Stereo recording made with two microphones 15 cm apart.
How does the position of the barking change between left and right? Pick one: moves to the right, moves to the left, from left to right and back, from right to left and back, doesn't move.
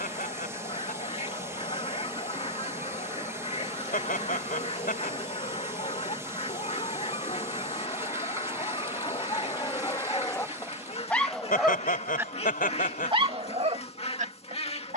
moves to the right.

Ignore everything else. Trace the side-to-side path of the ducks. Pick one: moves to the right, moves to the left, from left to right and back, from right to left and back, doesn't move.
doesn't move.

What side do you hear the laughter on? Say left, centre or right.
left.